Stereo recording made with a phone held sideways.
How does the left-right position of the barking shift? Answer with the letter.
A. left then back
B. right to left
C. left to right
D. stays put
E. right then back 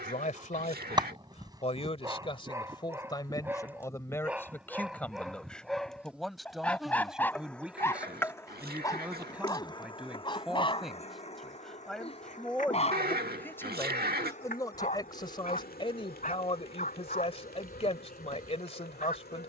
B.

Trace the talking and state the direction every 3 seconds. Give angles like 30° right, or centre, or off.
40° left, 10° left, centre, centre, 10° left, 40° left, 40° left.